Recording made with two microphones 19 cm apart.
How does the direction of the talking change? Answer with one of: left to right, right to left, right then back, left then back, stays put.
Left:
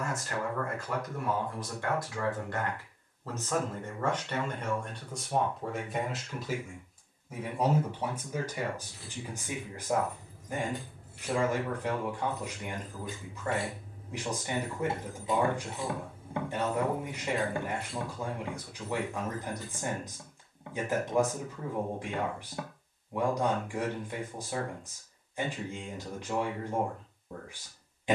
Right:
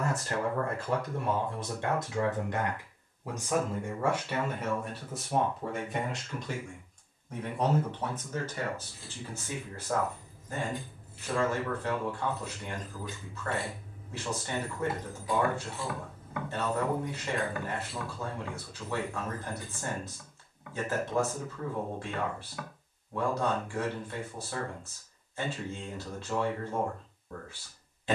right to left.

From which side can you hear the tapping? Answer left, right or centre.
left.